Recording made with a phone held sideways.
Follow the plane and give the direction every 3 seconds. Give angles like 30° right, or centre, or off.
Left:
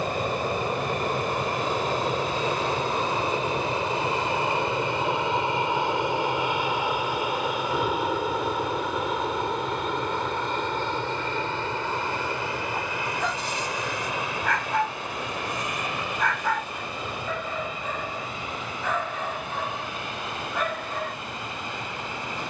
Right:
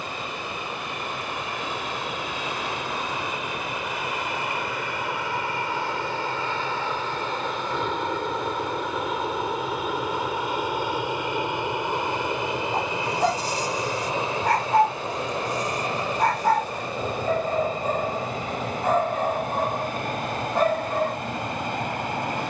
40° left, 30° left, 10° left, 10° right, 20° right, 40° right, 40° right, 50° right.